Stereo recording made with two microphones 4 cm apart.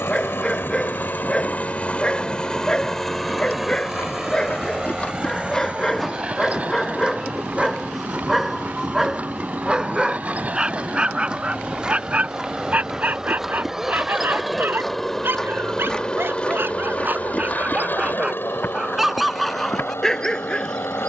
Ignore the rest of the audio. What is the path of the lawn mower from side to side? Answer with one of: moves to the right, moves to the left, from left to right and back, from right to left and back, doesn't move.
from left to right and back.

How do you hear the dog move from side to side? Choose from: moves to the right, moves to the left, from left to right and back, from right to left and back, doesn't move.
from left to right and back.